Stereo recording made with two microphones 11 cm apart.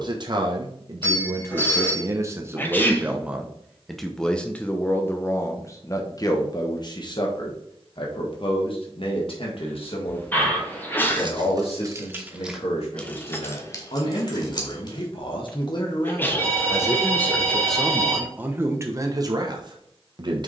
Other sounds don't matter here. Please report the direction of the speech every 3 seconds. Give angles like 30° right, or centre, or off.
30° right, 10° left, 50° left, 60° left, 70° left, 30° left, 30° right.